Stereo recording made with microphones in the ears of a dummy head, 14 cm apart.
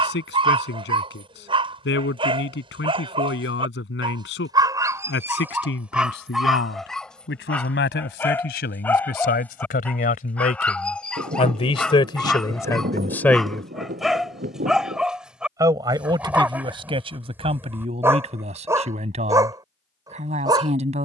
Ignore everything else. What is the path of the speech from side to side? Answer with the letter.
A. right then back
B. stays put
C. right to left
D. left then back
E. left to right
E.